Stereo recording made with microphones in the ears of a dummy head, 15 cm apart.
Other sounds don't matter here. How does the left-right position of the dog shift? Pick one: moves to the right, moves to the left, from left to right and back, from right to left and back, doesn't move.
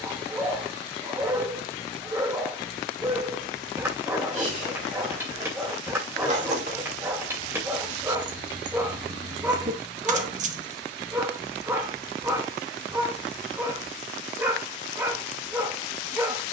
doesn't move.